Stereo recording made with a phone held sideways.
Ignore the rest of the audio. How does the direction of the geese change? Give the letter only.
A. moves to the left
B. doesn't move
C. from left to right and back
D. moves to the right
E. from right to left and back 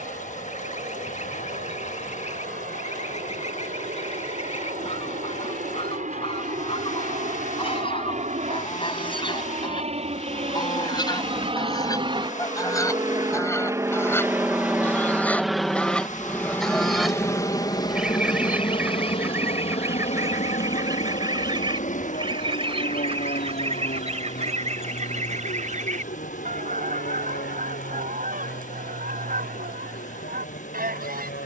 D.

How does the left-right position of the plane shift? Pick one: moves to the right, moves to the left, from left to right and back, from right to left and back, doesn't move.
moves to the left.